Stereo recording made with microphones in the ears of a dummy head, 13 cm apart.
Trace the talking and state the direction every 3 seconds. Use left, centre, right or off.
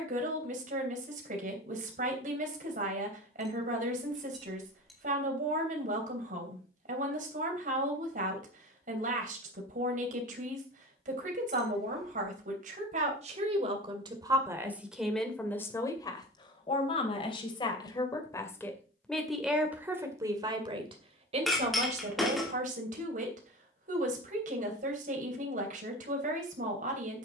right, right, right, right, right, left, centre, right, right.